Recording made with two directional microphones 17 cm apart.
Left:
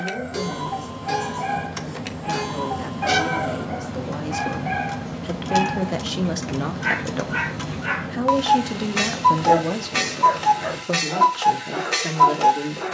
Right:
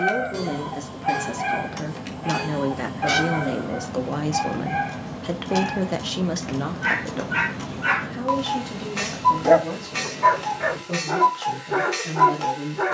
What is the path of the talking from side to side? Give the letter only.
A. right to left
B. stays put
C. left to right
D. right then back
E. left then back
A.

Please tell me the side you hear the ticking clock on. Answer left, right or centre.
left.